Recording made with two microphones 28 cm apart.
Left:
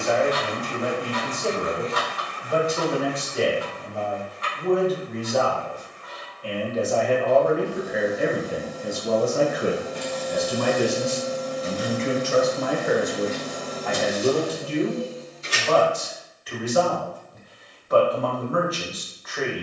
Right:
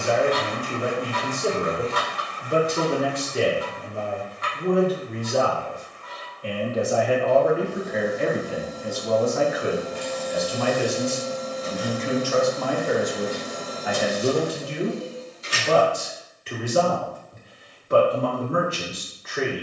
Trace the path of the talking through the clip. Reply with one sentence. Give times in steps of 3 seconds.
You can hear the talking on the right from 0 s, in the centre from 6 s, on the left from 9 s, in the centre from 12 s and on the right from 15 s.